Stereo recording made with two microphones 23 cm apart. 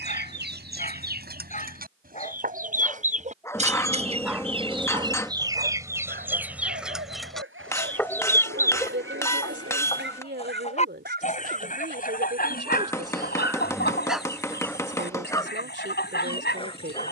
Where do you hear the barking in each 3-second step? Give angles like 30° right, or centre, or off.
30° left, 10° right, 60° right, 50° right, 10° right, 20° left.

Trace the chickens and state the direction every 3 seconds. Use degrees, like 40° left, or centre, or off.
40° right, 20° right, centre, 30° left, 50° left, 50° left.